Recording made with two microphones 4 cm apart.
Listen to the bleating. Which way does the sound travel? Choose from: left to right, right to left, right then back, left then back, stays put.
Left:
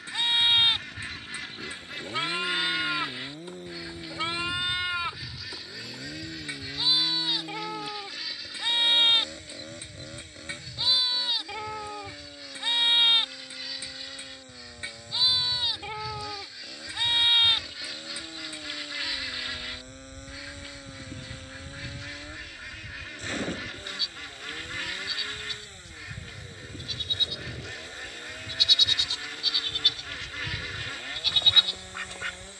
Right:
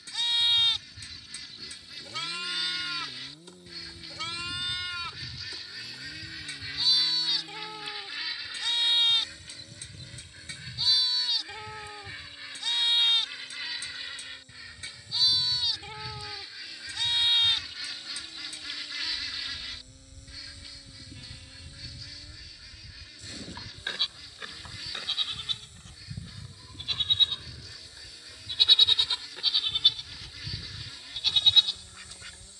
right then back.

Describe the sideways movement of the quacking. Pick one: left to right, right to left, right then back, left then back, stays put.
right then back.